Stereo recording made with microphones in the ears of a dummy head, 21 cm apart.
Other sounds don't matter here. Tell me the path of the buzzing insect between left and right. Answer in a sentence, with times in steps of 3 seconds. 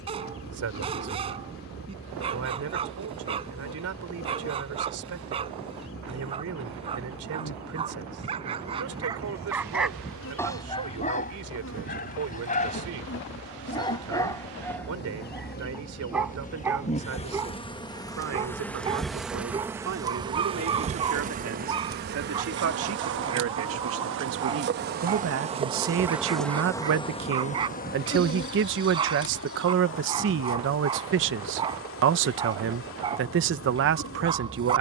In this clip you hear the buzzing insect on the left from 0 s, in the centre from 18 s, on the right from 21 s and on the left from 27 s.